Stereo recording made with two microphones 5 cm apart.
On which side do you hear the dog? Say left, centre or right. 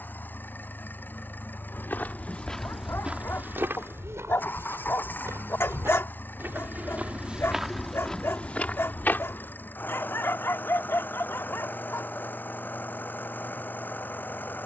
left.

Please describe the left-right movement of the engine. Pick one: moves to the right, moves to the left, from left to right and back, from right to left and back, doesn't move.
doesn't move.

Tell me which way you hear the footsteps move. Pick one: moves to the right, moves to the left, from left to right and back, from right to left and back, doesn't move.
from left to right and back.